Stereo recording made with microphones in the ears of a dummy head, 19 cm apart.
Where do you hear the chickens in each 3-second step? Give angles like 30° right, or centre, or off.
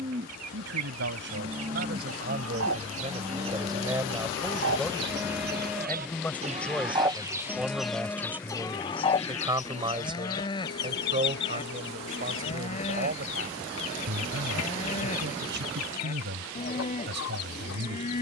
70° right, 50° right, centre, 40° left, 60° left, 70° left.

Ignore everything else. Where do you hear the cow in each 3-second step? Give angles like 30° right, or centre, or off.
20° right, 10° right, 10° left, 20° left, 30° left, 30° left.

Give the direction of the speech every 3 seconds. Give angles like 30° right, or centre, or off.
50° right, 10° right, centre, 30° right, 50° right, 60° right.